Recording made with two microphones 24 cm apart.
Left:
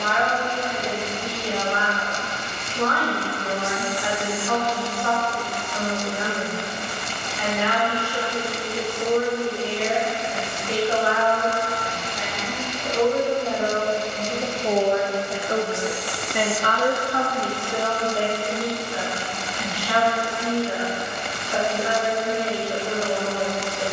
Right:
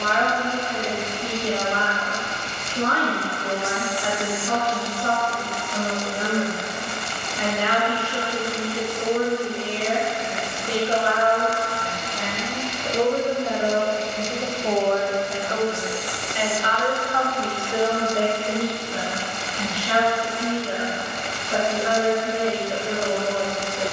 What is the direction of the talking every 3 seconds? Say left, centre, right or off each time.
right, right, right, right, centre, left, right, right.